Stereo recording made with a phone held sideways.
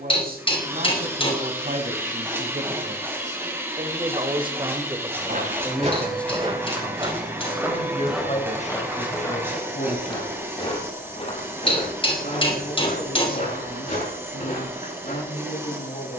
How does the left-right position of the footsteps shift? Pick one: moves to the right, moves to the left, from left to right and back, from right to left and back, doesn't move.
moves to the left.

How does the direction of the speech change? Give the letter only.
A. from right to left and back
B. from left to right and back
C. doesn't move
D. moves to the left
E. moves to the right
D.